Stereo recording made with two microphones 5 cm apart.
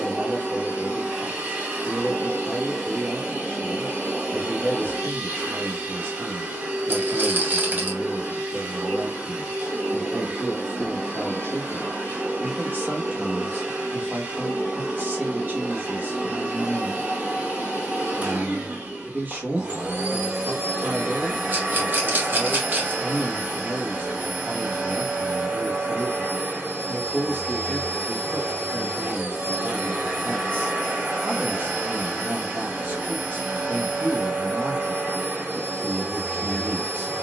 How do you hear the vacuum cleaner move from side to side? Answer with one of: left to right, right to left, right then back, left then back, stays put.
stays put.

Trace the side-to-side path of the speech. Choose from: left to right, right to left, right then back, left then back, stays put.
stays put.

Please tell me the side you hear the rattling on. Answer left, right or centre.
right.